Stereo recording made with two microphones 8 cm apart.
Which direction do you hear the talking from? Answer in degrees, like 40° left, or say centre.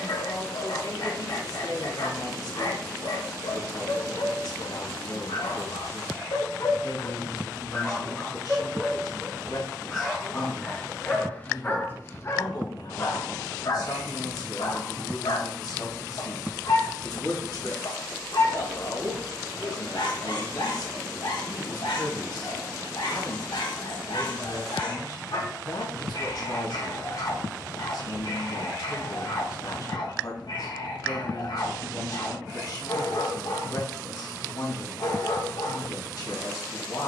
60° left.